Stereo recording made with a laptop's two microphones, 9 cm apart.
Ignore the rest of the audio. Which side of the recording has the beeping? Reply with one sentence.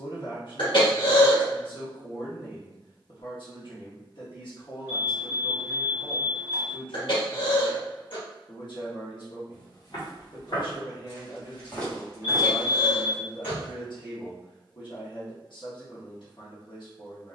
In this clip you hear the beeping on the right.